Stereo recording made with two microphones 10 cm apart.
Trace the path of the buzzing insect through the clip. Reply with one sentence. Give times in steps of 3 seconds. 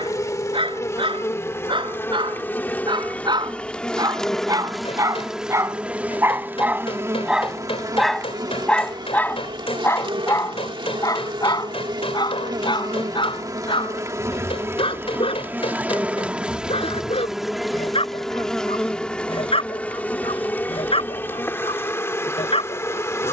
You can hear the buzzing insect on the left from 0 s, in the centre from 3 s, on the right from 6 s, in the centre from 15 s and on the left from 21 s.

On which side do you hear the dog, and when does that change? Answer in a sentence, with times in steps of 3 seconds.
In this clip you hear the dog on the right from 0 s, in the centre from 6 s and on the left from 9 s.